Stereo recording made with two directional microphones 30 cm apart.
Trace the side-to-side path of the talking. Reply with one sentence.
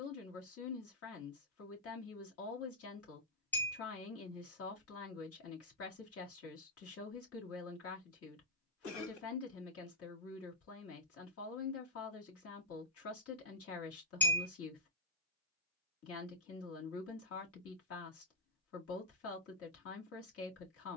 In this clip you hear the talking stay put.